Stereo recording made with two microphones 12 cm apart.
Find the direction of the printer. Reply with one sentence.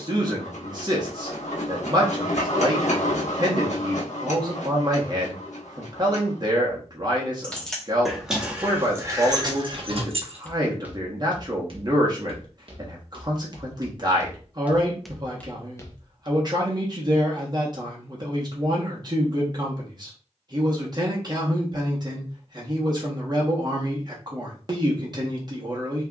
You can hear the printer on the left.